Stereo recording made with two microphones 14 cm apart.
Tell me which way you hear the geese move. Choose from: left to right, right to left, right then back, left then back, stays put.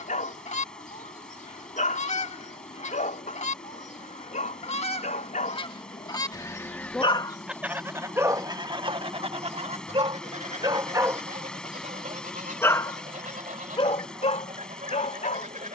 left to right.